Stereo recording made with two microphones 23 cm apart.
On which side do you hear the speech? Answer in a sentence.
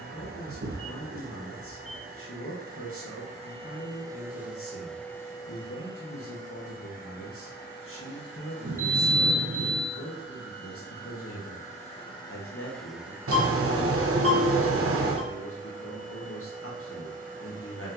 You can hear the speech on the left.